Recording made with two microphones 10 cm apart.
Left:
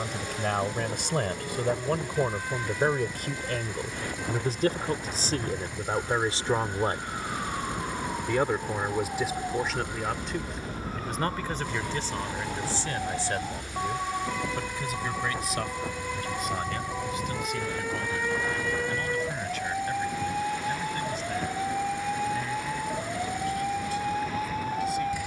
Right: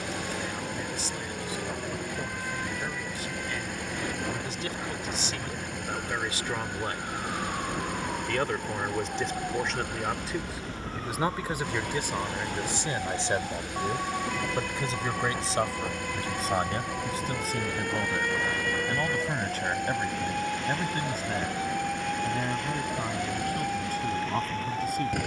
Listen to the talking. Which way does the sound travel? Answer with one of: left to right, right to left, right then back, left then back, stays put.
left to right.